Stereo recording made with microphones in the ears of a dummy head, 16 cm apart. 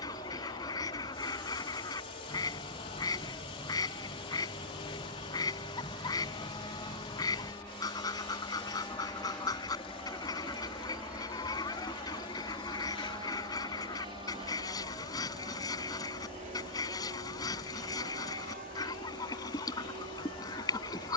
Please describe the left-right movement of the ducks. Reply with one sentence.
You can hear the ducks stay in one place.